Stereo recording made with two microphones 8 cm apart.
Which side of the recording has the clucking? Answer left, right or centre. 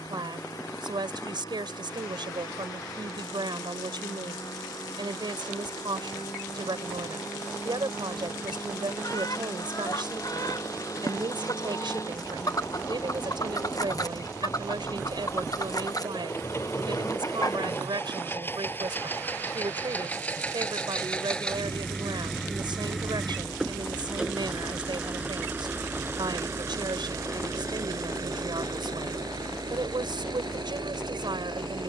left.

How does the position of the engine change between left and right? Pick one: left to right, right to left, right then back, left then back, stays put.
left to right.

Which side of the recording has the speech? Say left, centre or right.
right.